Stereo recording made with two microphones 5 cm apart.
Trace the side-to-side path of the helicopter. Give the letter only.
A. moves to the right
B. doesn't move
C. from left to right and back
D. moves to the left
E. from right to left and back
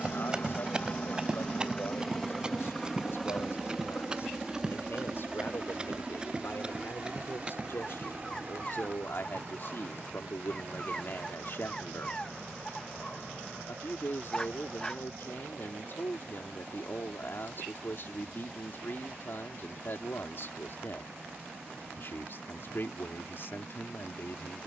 A.